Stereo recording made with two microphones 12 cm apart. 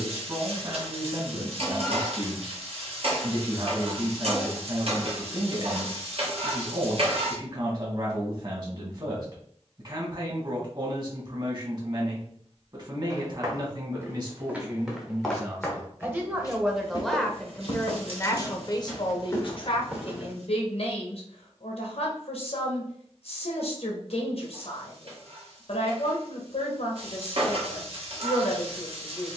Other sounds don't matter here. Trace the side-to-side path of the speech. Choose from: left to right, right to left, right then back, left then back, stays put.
right to left.